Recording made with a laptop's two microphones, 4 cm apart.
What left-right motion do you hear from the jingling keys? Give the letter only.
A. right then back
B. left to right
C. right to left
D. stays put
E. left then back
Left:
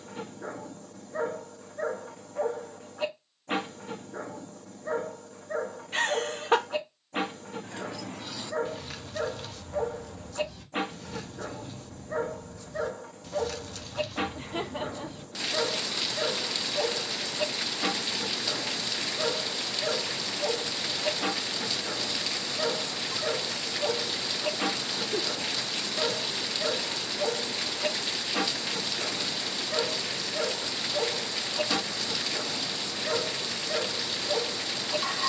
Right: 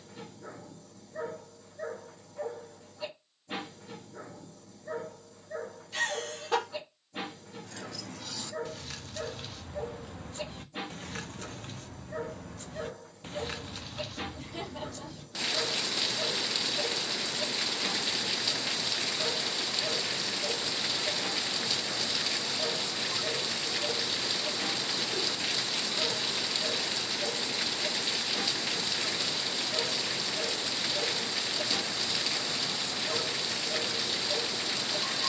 A.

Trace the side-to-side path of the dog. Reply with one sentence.
In this clip you hear the dog stay in one place.